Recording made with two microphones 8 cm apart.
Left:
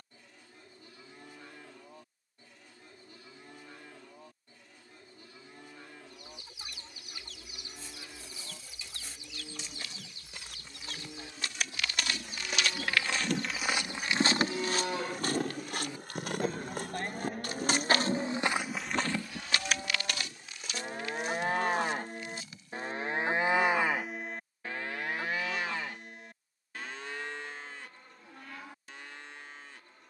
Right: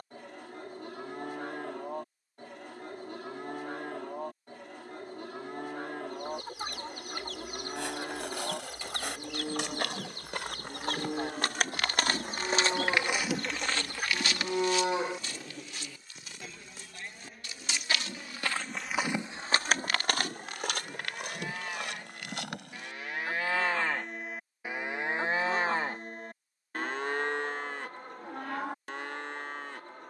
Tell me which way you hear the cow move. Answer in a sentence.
You can hear the cow go left and come back.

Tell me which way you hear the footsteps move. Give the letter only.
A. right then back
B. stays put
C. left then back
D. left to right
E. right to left
C.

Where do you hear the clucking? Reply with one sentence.
In this clip you hear the clucking on the right.